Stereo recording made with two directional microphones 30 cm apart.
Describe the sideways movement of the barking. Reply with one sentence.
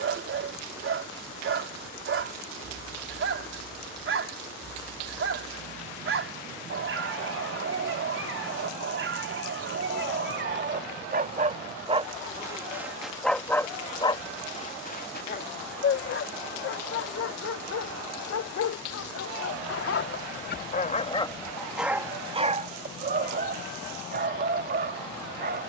In this clip you hear the barking move from right to left and back again.